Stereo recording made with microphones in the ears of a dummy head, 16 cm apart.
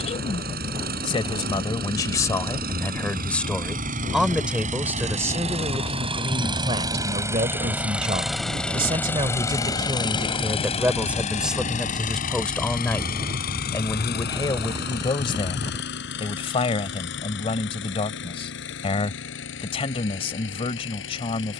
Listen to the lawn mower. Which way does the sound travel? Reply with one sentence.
In this clip you hear the lawn mower move to the left.